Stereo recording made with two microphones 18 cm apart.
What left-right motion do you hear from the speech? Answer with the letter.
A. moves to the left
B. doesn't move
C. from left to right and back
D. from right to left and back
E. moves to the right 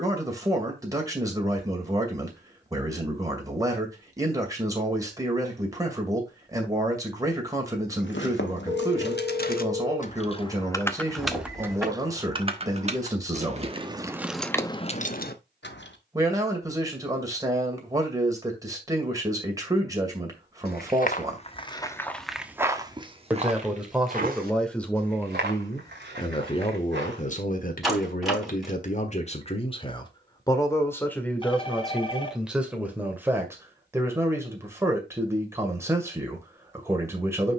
D.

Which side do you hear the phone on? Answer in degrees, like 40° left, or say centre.
30° left.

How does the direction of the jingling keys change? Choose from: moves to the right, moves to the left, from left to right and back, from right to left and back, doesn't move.
from left to right and back.